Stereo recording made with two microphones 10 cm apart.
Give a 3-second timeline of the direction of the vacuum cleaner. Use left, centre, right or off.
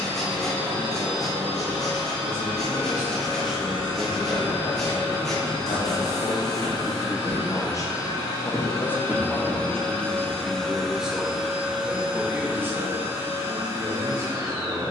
left, left, left, centre, right.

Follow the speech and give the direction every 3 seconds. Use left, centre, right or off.
right, centre, left, centre, right.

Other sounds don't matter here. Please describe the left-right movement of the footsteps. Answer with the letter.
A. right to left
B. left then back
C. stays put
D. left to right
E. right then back
D.